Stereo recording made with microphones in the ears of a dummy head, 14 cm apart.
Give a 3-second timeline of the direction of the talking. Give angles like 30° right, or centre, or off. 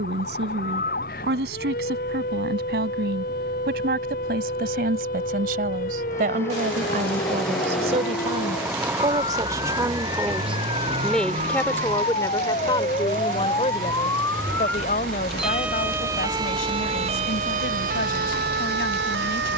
70° right, 60° right, 40° right, 10° right, 30° left, 60° left, 70° left.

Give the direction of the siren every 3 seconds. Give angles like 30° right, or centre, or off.
60° left, 60° left, 50° left, 50° left, 30° left, 30° right, 70° right.